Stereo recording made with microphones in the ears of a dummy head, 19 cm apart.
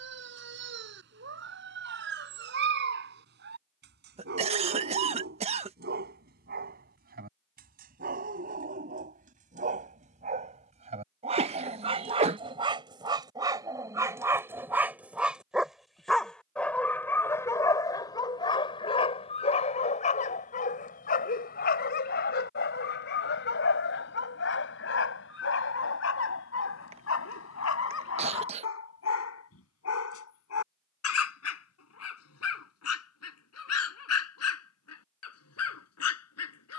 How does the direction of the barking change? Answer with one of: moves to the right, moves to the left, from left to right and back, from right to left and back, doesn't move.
moves to the left.